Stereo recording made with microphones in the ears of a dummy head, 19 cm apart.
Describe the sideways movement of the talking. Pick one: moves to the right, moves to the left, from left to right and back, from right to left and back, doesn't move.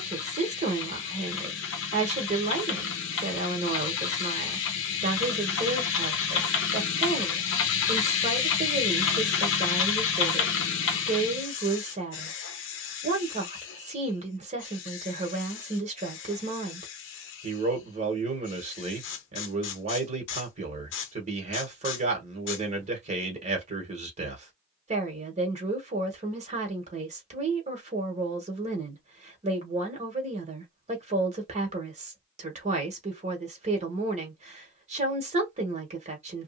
doesn't move.